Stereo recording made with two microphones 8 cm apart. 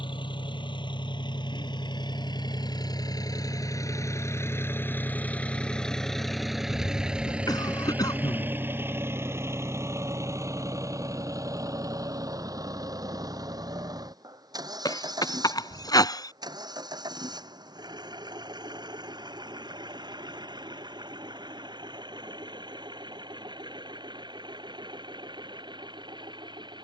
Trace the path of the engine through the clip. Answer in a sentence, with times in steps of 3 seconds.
You can hear the engine on the left from 0 s, in the centre from 6 s and on the right from 9 s.